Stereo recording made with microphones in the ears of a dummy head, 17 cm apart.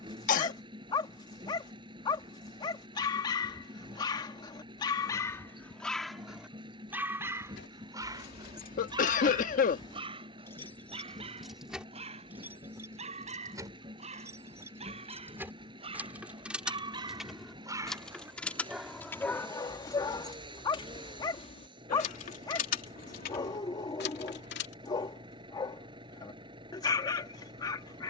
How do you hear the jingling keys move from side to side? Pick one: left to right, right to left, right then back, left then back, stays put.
right then back.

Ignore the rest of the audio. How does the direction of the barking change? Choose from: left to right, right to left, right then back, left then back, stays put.
right then back.